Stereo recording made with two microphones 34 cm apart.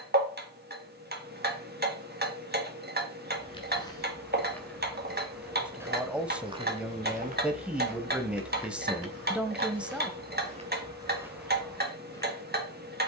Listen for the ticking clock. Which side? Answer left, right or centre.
right.